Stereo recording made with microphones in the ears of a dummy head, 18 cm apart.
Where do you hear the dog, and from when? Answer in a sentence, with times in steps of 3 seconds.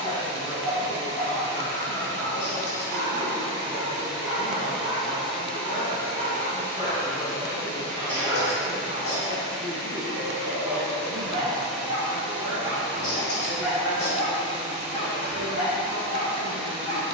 You can hear the dog on the left from 0 s, in the centre from 3 s, on the right from 6 s, in the centre from 12 s and on the left from 15 s.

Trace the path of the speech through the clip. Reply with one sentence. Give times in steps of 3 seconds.
You can hear the speech on the left from 0 s, in the centre from 6 s and on the right from 9 s.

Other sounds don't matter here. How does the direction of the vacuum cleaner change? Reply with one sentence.
In this clip you hear the vacuum cleaner go left and come back.